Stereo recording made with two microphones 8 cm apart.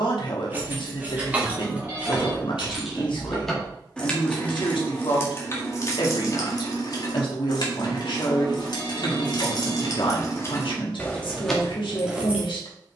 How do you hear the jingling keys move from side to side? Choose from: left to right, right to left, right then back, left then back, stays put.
left then back.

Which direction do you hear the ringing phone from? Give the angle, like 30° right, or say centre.
30° right.